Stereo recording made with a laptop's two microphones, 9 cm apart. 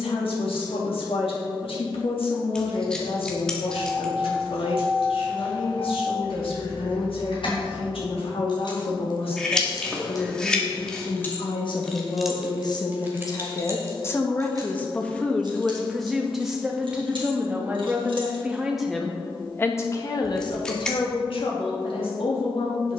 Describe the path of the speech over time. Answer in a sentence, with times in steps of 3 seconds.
You can hear the speech on the left from 0 s, in the centre from 15 s and on the left from 18 s.